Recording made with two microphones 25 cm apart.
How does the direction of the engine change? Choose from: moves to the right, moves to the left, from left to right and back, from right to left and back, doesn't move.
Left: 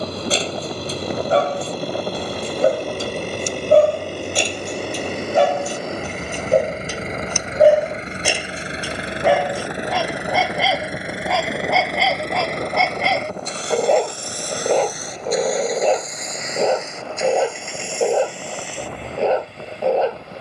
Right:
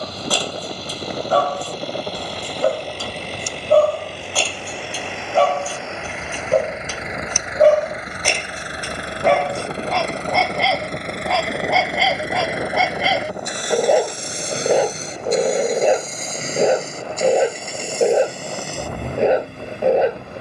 moves to the right.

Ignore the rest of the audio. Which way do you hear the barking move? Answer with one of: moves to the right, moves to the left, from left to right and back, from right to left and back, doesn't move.
moves to the right.